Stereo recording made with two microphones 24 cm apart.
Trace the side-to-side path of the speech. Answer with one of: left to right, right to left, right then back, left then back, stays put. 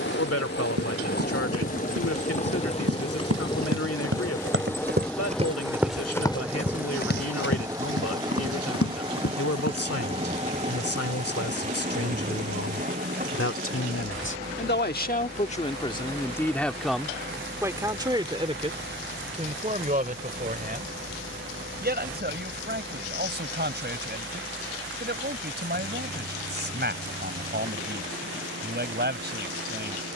left to right.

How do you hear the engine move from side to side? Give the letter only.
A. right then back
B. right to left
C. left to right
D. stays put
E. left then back
C.